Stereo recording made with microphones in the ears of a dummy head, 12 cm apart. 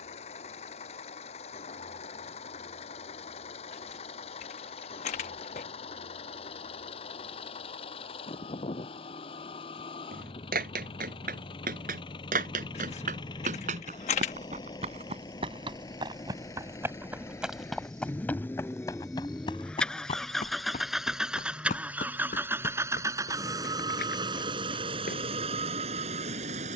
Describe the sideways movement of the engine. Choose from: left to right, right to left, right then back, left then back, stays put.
left to right.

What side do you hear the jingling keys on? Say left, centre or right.
left.